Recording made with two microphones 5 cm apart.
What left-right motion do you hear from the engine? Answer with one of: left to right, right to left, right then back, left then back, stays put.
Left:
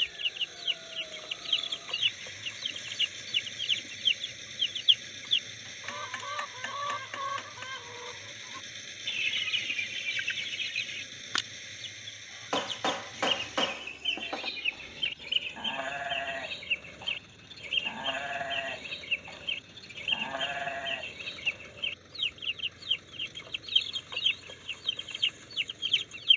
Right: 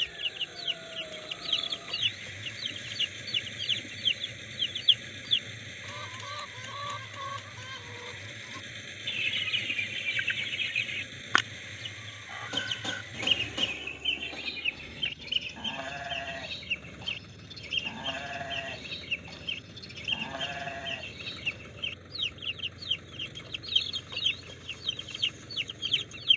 stays put.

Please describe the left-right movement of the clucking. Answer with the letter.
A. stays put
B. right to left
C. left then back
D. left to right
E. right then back
E.